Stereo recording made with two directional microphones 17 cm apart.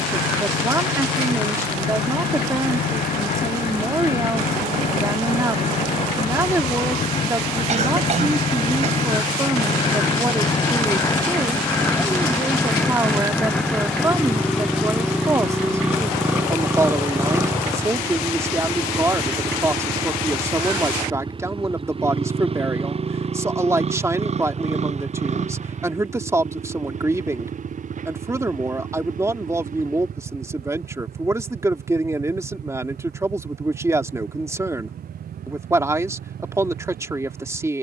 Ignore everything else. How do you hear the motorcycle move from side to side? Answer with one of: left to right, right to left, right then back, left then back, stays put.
left to right.